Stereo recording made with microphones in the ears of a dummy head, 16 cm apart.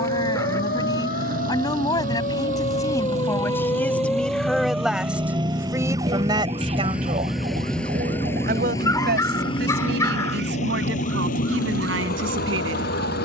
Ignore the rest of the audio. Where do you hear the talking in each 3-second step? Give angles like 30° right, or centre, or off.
20° left, centre, 40° right, 70° right, 80° right.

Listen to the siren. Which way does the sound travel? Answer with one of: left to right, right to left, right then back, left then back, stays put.
left to right.